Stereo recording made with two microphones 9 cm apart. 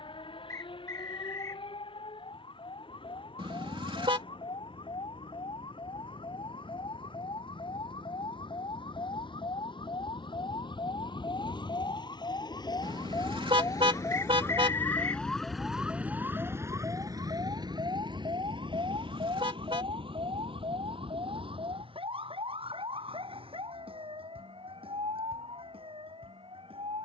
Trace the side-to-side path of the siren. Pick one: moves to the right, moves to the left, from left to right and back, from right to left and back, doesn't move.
moves to the right.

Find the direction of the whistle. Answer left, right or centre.
left.